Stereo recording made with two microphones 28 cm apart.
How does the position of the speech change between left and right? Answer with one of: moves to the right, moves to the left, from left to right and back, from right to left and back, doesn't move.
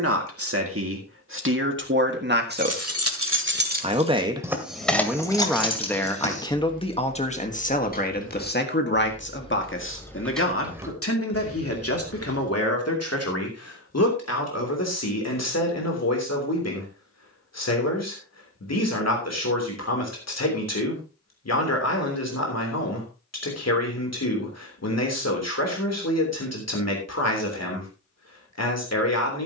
moves to the left.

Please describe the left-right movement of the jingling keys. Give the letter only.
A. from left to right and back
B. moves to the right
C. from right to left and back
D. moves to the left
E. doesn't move
C.